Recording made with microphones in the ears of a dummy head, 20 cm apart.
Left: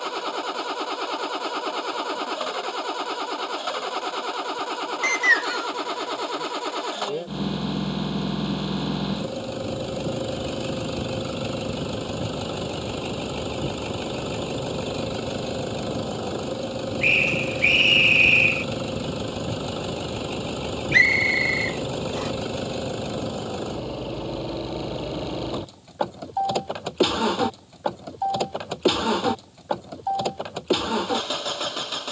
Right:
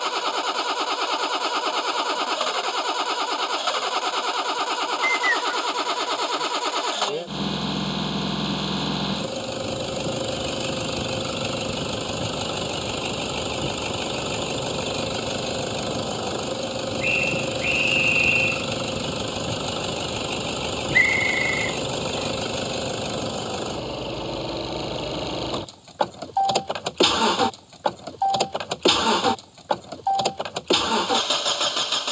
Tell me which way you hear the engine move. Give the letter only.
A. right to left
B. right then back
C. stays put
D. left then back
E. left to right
C.